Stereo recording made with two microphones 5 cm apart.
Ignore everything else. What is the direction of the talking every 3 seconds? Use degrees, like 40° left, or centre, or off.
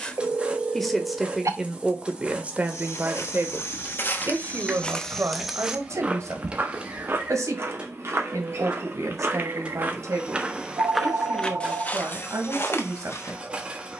10° right, 50° right, 70° right, 70° right, 70° right.